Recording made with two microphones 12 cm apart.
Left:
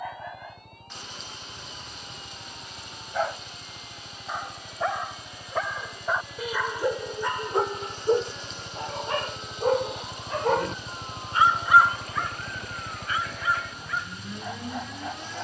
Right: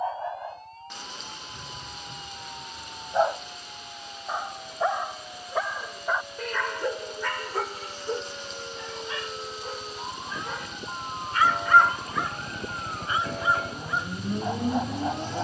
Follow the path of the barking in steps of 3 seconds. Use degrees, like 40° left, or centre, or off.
30° right, 10° right, 20° left, 40° left, 20° right.